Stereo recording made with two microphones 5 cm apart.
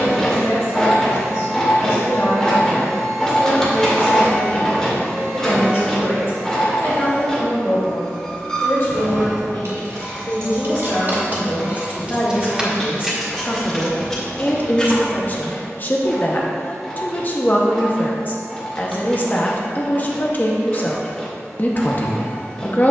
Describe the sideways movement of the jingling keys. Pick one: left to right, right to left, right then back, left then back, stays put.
right to left.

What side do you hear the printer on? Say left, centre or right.
centre.